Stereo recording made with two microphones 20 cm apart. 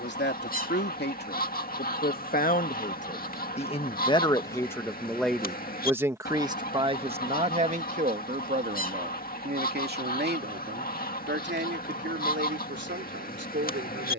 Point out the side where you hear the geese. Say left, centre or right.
left.